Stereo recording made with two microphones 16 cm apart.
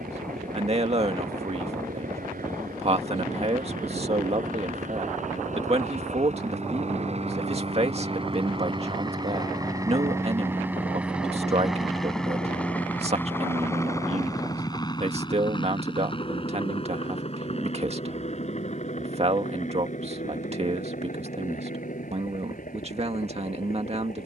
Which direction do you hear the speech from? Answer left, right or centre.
right.